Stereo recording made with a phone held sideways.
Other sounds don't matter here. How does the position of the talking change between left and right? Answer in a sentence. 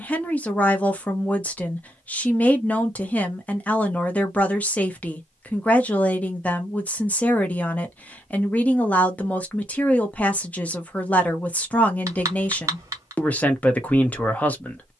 In this clip you hear the talking stay put.